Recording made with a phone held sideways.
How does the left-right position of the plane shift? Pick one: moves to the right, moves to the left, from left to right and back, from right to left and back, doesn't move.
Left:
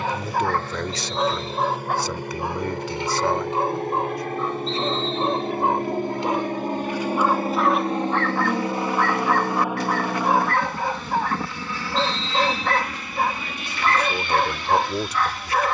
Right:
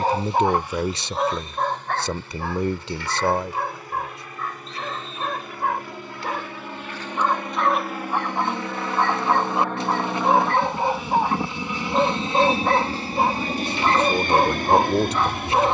moves to the right.